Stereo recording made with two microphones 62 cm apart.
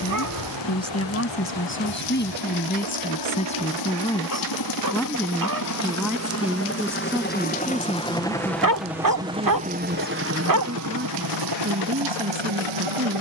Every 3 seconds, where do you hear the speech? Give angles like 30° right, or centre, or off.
20° left, 10° left, 10° right, 10° right, 20° right.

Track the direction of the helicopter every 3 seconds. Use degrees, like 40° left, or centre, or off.
40° left, 30° left, 10° left, 20° right, 50° right.